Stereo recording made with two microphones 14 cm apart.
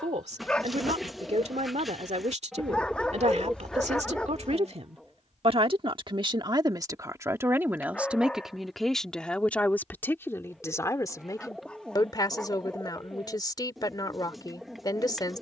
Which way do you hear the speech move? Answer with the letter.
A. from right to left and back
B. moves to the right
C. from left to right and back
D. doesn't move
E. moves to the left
E.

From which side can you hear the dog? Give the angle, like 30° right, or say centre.
10° left.